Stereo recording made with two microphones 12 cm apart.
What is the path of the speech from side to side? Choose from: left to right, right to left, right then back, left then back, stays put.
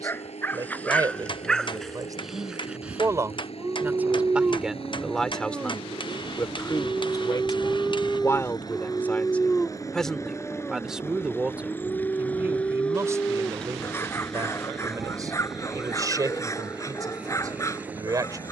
left then back.